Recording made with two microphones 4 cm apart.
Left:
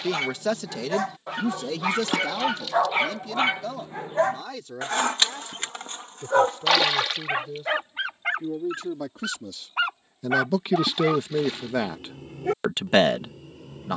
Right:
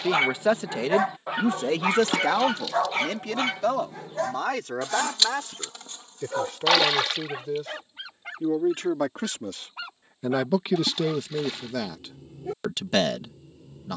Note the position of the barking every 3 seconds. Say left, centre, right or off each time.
centre, left, left, left, left.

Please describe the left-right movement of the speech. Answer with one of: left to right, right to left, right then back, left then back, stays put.
right then back.